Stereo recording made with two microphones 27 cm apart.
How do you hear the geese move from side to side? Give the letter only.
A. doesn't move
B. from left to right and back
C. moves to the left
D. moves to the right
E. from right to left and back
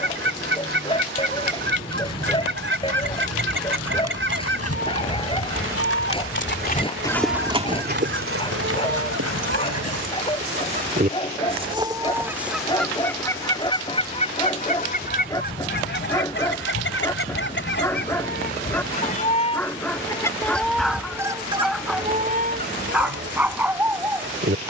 E.